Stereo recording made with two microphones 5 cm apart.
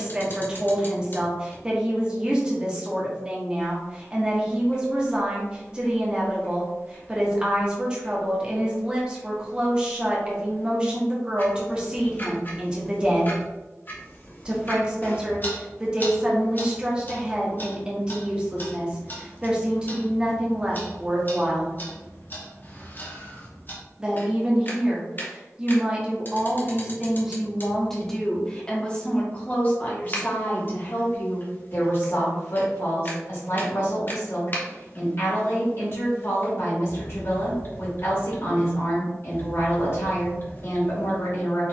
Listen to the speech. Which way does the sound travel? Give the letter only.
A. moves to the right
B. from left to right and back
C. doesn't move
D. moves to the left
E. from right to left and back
D.